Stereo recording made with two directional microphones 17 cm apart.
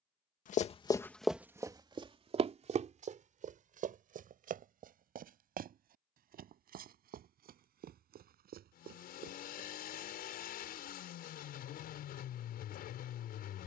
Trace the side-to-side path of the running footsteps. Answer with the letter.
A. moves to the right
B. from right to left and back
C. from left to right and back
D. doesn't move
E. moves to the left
A.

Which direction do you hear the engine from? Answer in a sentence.
In this clip you hear the engine on the left.